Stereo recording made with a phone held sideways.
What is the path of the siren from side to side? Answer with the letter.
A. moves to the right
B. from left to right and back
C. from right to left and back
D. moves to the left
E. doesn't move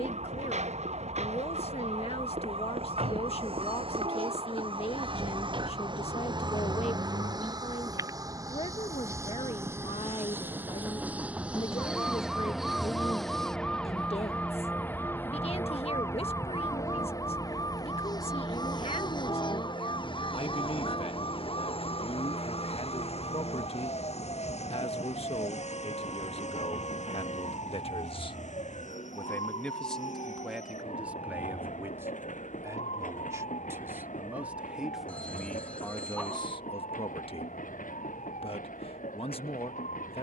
D.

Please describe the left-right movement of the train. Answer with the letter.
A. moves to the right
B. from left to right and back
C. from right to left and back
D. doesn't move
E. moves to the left
E.